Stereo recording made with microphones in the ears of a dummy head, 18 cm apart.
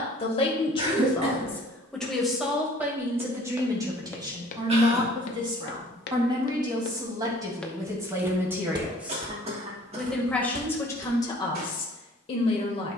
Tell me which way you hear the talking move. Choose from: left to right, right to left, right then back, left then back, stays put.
right then back.